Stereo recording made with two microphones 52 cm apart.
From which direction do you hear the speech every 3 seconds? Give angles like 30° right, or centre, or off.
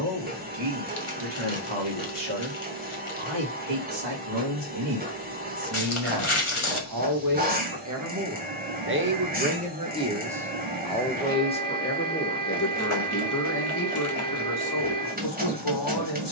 60° right, 50° right, 40° right, centre, 30° left, 50° left.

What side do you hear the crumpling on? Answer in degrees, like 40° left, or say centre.
70° left.